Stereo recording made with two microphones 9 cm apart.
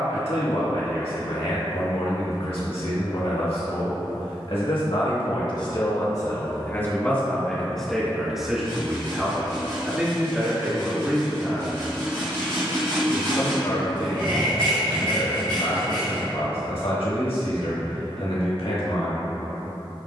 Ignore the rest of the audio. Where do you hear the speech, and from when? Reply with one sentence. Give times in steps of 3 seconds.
You can hear the speech on the left from 0 s, in the centre from 6 s and on the left from 12 s.